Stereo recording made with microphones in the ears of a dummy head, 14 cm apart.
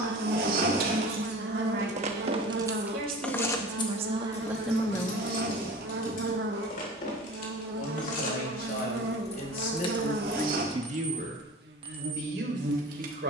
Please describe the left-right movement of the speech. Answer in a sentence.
In this clip you hear the speech go left and come back.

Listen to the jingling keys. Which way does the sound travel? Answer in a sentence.
You can hear the jingling keys go left and come back.